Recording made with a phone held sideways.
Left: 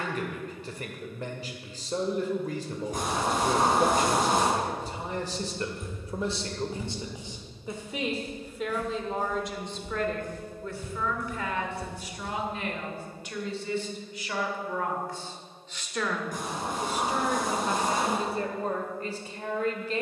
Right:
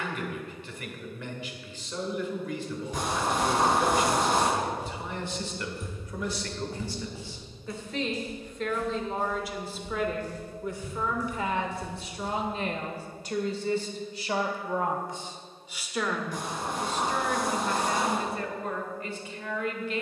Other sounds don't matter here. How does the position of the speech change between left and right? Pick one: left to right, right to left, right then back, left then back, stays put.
right then back.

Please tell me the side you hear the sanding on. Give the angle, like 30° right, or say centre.
50° left.